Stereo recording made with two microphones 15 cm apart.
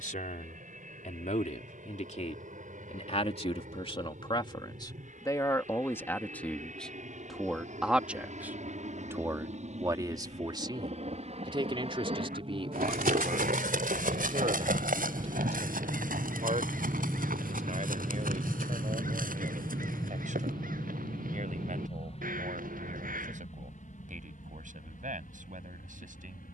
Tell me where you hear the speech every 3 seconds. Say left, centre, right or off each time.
left, left, centre, right, right, right, right, right, right.